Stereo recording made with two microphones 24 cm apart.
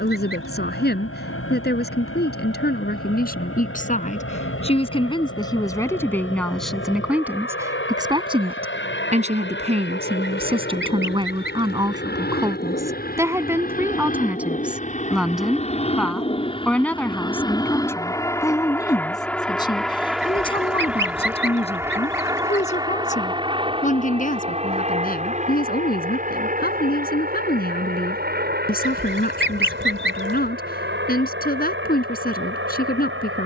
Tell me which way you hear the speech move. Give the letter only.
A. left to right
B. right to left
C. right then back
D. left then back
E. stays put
C.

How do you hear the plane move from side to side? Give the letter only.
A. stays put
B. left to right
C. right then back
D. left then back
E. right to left
B.